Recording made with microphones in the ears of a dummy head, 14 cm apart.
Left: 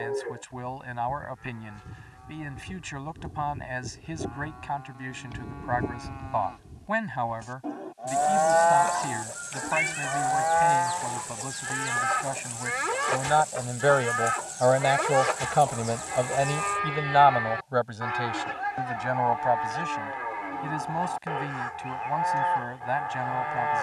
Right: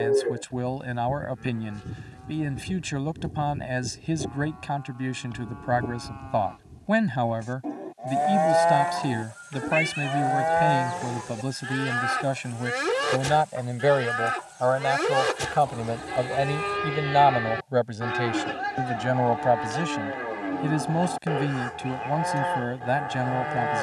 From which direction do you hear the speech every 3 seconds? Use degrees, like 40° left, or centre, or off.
50° right, 50° right, 50° right, 50° right, 20° right, 10° right, 40° right, 50° right.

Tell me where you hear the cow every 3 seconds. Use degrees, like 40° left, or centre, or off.
40° right, centre, 10° right, 40° right, 40° right, 40° right, 40° right, 40° right.